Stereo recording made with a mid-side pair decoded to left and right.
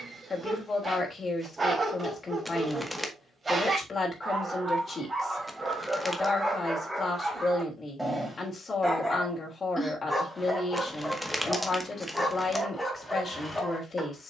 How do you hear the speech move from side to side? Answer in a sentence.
In this clip you hear the speech stay put.